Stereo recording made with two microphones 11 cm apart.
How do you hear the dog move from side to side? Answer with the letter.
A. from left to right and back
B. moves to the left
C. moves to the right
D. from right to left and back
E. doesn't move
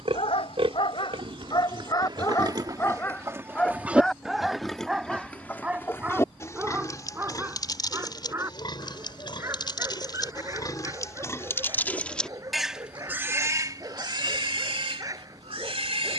C.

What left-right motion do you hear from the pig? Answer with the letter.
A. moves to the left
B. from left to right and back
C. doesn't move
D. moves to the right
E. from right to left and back
E.